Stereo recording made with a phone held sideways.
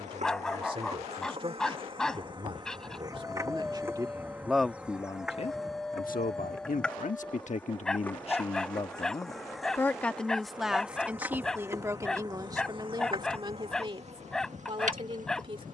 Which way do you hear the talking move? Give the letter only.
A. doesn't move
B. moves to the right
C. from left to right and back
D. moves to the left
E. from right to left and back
E.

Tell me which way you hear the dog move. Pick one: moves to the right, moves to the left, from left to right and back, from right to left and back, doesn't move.
doesn't move.